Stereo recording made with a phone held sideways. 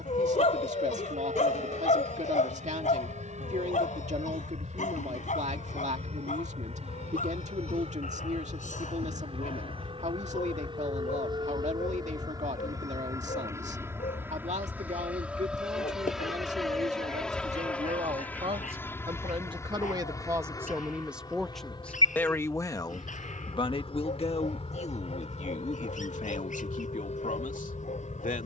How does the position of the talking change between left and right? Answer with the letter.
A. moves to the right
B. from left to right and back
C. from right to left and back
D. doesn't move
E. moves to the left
E.